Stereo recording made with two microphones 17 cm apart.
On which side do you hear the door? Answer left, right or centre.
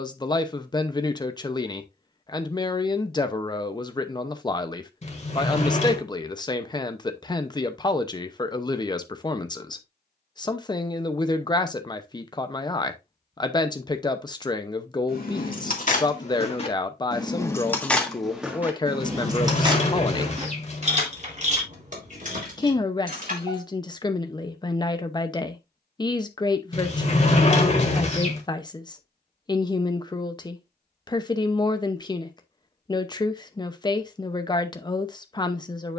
left.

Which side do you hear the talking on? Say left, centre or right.
left.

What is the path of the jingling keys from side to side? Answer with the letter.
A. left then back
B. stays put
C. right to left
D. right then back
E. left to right
E.